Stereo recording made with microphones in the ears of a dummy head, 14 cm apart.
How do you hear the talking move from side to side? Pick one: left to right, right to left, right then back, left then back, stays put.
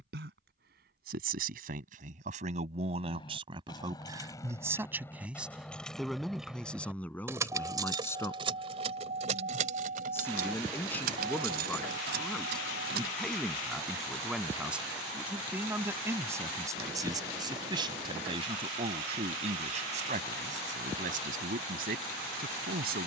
left then back.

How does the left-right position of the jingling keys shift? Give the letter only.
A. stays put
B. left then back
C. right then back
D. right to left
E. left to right
E.